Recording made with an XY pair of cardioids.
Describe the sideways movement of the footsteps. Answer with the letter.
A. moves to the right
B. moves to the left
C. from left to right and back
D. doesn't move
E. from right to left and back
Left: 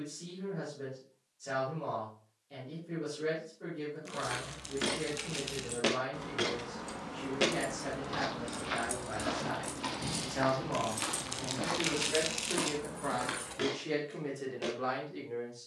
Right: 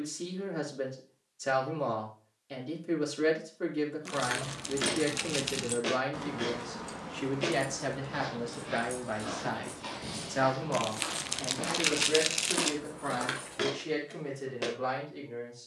E.